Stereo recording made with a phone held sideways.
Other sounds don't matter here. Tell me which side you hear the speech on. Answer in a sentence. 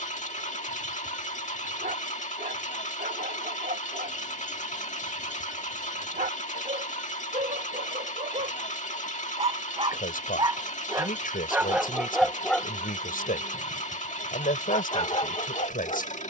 In this clip you hear the speech on the left.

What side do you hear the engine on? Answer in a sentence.
You can hear the engine on the left.